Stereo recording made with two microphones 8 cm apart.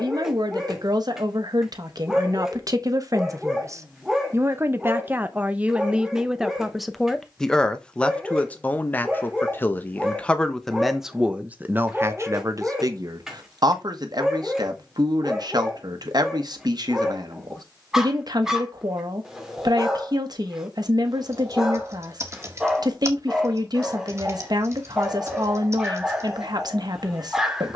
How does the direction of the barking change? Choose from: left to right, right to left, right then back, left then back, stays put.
stays put.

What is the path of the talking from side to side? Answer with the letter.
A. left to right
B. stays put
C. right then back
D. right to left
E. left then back
E.